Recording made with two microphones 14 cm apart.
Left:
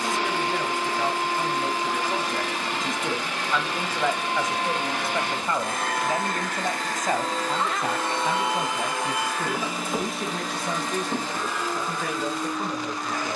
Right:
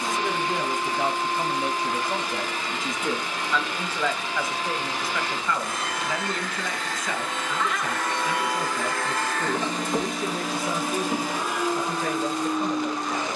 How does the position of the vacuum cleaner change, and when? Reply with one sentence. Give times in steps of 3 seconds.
In this clip you hear the vacuum cleaner on the left from 0 s, in the centre from 9 s and on the right from 12 s.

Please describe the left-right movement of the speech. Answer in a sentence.
You can hear the speech move from right to left.